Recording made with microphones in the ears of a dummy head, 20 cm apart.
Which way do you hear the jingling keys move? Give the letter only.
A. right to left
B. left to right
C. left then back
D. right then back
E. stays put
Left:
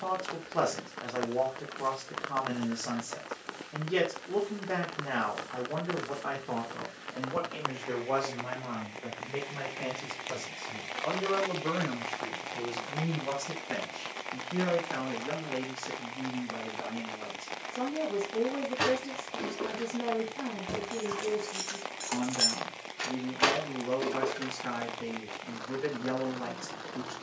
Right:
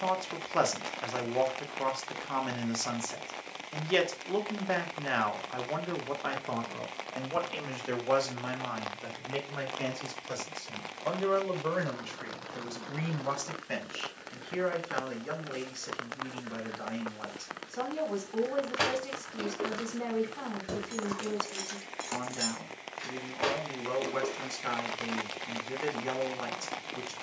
A.